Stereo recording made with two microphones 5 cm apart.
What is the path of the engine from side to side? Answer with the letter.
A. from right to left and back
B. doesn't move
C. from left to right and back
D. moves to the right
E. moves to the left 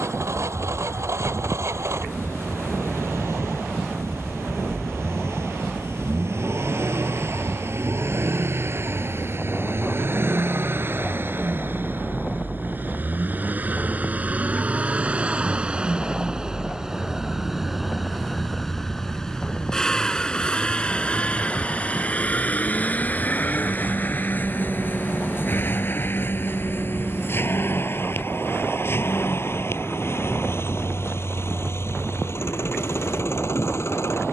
E.